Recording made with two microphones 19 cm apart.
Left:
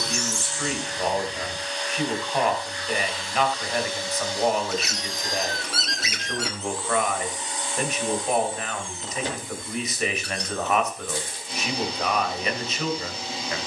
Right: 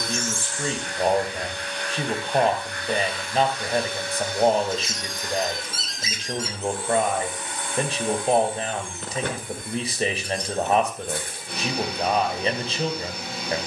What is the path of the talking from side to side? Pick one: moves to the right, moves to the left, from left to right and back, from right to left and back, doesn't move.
doesn't move.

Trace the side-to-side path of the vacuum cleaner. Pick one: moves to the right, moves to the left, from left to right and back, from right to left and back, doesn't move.
doesn't move.